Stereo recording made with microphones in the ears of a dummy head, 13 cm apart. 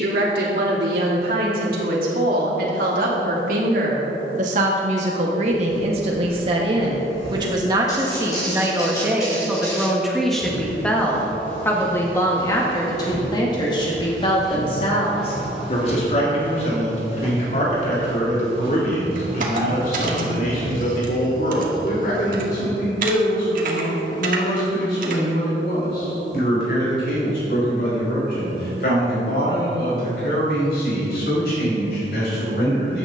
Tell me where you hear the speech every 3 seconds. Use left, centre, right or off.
right, right, right, centre, left, left, left, left, left, left, left.